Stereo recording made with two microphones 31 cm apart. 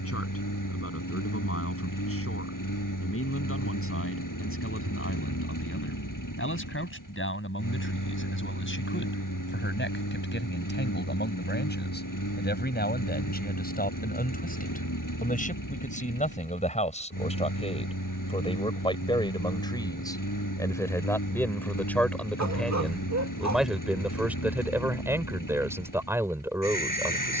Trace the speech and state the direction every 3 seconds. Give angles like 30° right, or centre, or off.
50° left, 40° left, 40° left, 30° left, 30° left, 20° left, 10° left, centre, 10° right.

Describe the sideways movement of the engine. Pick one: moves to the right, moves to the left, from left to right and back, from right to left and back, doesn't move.
doesn't move.